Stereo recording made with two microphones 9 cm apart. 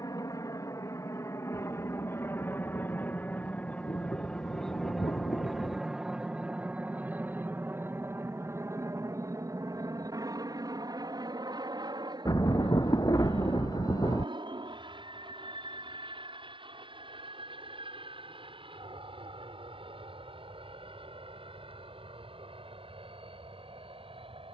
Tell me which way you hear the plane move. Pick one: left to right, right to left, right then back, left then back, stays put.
left to right.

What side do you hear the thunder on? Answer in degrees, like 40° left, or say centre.
40° left.